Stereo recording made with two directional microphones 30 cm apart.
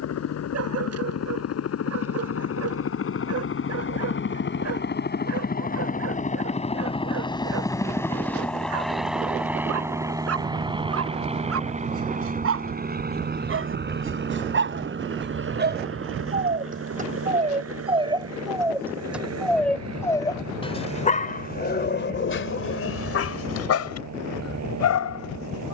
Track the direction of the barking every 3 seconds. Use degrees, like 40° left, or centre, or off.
50° right, 50° right, 50° right, 50° right, 40° right, 30° right, centre, 40° left, 60° left.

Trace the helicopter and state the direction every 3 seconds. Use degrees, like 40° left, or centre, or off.
60° left, 40° left, 10° left, 10° right, 30° right, 40° right, 50° right, 60° right, 60° right.